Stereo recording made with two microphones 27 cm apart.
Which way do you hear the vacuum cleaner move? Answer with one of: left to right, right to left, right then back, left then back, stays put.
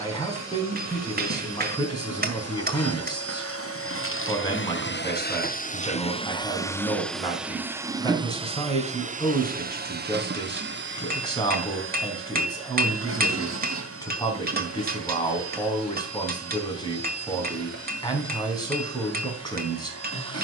left to right.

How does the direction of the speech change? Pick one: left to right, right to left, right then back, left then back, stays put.
stays put.